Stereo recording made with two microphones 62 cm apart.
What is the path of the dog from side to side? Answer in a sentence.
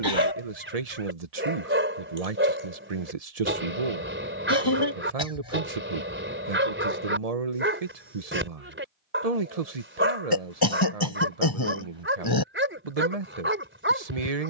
You can hear the dog stay in one place.